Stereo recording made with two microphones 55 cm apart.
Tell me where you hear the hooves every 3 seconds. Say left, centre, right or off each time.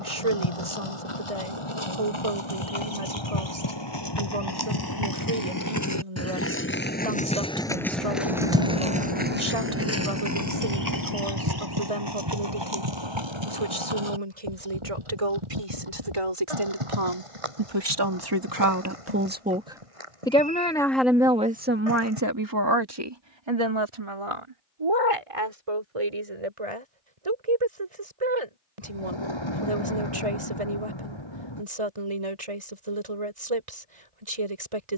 left, left, centre, right, right, right, right, right, off, off, off, off.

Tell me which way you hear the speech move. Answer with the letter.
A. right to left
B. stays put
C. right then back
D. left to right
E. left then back
E.